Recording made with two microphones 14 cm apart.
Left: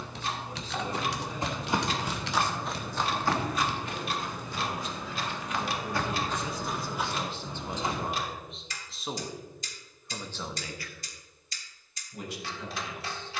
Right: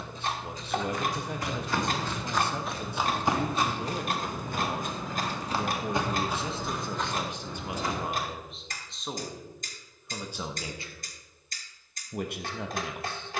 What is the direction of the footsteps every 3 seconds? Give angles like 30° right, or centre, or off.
20° left, 40° right, 10° left, off, off.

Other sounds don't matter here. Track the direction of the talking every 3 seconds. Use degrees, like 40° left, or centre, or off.
70° right, 60° right, 10° right, 20° right, 60° right.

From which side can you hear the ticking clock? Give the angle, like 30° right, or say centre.
50° right.